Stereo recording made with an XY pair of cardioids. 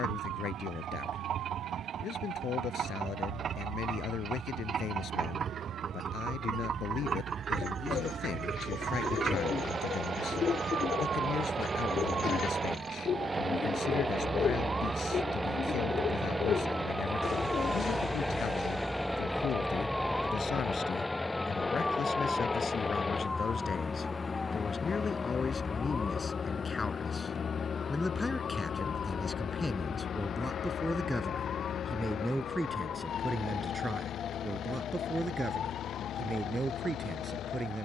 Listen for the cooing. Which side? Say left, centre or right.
left.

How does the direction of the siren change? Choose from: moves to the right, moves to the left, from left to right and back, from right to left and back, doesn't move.
moves to the left.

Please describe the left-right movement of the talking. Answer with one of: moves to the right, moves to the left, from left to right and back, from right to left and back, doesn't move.
moves to the right.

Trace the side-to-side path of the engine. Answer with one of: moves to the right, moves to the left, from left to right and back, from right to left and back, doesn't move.
moves to the left.